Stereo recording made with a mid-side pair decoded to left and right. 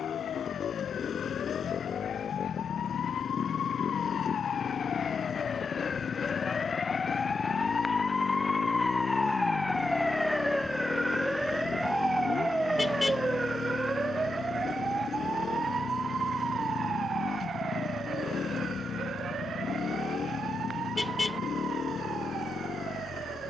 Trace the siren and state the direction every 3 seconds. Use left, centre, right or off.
left, left, left, centre, right, right, right, right.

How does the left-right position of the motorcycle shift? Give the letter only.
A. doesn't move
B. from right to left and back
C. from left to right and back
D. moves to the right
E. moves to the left
A.